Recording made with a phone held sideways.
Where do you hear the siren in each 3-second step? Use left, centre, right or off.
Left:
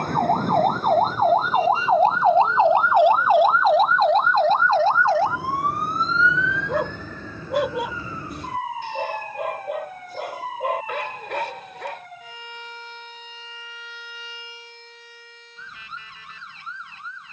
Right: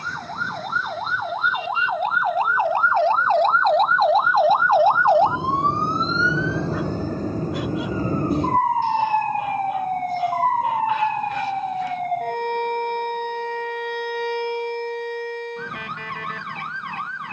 left, centre, right, right, right, right.